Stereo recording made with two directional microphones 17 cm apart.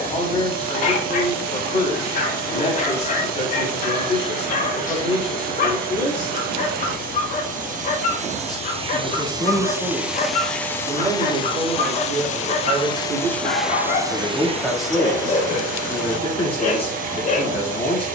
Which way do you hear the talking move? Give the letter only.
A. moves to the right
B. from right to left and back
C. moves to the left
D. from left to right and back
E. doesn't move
D.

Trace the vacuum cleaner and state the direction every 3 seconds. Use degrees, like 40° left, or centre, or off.
50° right, 50° right, 50° right, centre, centre, 50° right.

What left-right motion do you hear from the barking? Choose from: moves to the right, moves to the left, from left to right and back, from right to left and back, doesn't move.
doesn't move.